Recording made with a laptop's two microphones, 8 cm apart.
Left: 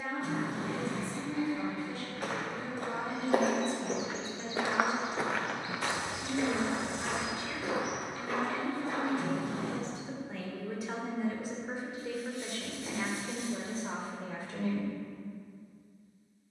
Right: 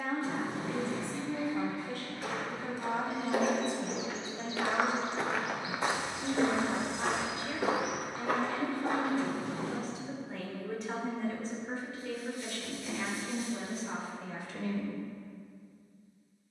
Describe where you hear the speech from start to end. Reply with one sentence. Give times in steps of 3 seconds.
You can hear the speech on the right from 0 s, in the centre from 9 s, on the left from 12 s and not at all from 15 s.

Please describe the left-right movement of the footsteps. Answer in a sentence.
In this clip you hear the footsteps move to the right.